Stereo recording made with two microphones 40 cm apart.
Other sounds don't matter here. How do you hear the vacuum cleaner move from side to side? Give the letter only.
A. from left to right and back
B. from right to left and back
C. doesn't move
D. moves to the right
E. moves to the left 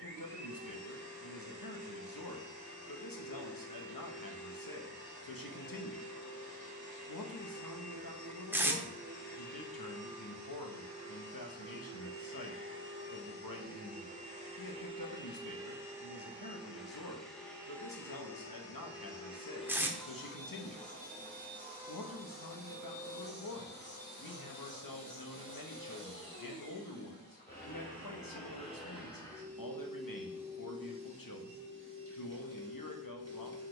B.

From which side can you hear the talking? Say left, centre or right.
left.